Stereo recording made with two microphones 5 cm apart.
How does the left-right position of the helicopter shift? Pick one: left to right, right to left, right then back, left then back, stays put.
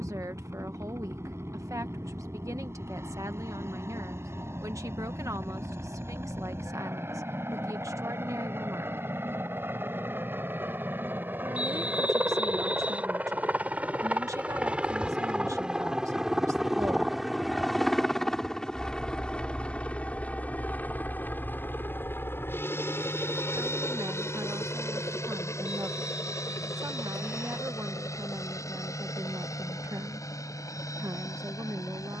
right to left.